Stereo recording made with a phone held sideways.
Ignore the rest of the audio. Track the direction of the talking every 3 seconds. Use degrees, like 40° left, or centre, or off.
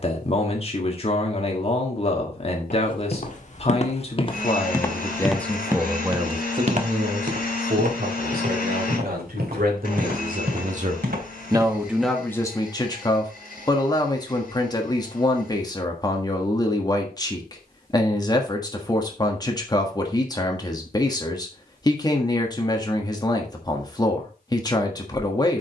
40° left, 20° left, 50° right, 50° right, 20° left, 20° left, 20° left, 20° left, 20° left.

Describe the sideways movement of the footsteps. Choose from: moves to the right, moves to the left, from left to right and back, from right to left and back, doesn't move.
moves to the right.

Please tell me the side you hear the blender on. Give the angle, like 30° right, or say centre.
60° left.